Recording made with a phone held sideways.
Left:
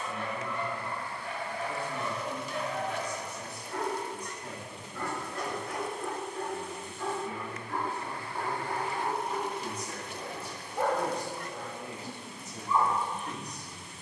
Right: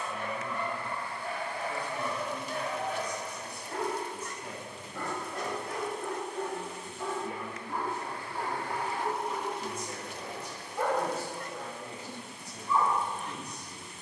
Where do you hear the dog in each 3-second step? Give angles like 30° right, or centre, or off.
40° right, 40° right, 10° right, 10° left, 20° left.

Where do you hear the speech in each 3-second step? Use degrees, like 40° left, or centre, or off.
30° left, 10° right, 40° right, 10° right, 30° left.